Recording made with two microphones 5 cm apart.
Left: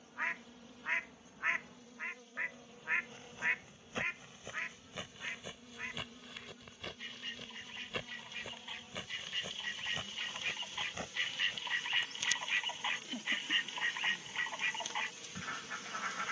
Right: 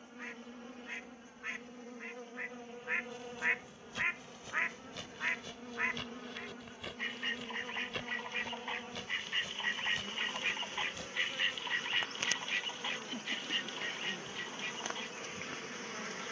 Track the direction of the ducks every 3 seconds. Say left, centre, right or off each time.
left, right, right, right, left, left.